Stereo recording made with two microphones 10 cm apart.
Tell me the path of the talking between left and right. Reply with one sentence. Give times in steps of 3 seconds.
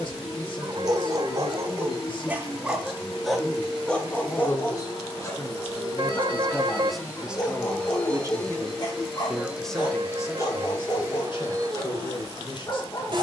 You can hear the talking on the left from 0 s, in the centre from 6 s and on the left from 9 s.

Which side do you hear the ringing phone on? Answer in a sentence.
In this clip you hear the ringing phone on the right.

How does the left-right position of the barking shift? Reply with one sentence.
You can hear the barking move to the left.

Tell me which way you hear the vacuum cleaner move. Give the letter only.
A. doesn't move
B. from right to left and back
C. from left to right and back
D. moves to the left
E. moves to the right
E.